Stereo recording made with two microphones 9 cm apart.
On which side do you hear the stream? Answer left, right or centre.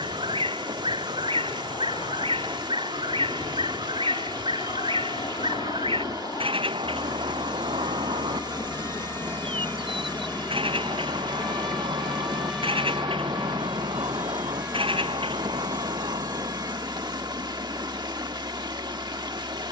right.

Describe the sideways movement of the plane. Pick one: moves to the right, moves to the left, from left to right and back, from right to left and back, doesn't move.
moves to the right.